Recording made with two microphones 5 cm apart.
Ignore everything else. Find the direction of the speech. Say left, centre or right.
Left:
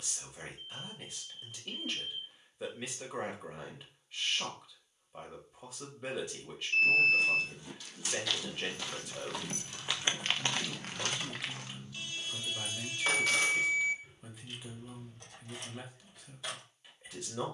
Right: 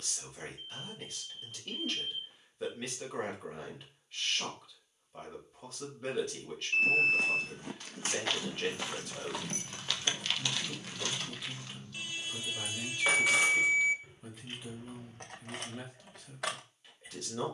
centre.